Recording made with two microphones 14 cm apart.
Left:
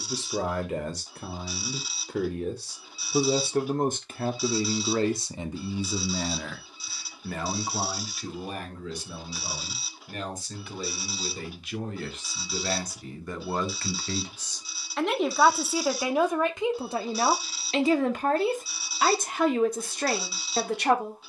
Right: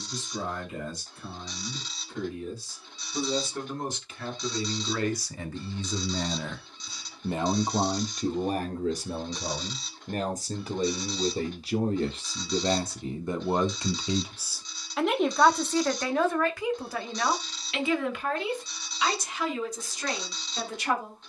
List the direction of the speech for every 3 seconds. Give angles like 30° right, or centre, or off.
70° left, 40° left, 20° right, 40° right, 20° right, 20° left, 50° left.